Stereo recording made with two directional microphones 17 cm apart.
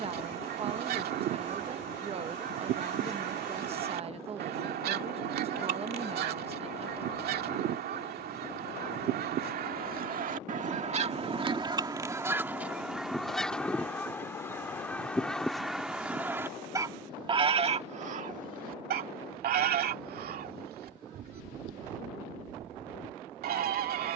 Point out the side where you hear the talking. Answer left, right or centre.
right.